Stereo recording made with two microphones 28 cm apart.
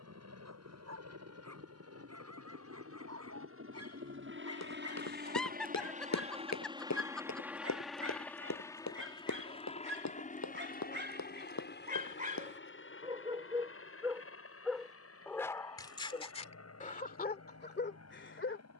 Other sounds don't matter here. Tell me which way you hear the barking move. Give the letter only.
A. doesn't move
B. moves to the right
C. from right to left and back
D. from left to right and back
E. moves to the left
E.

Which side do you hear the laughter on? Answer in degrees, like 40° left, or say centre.
centre.